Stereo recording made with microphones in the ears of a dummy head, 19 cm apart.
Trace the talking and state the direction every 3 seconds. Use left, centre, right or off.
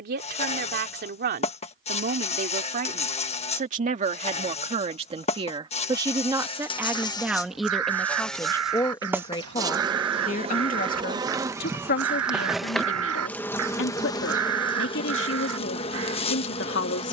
right, right, centre, left, left, left.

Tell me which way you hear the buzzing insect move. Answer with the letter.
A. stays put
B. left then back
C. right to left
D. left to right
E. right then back
E.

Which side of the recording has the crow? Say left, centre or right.
right.